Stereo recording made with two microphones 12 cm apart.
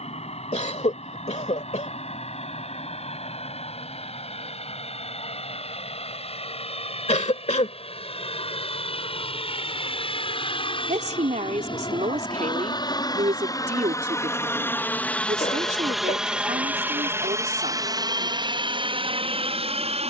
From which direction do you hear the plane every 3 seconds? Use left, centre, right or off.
left, left, left, left, left, centre, right.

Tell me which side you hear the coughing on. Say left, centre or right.
left.